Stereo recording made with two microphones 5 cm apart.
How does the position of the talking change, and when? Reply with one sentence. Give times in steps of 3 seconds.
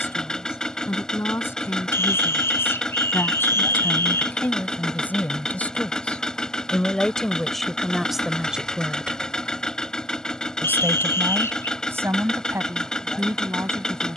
In this clip you hear the talking on the left from 0 s, in the centre from 6 s and on the right from 9 s.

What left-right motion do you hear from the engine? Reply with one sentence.
You can hear the engine stay put.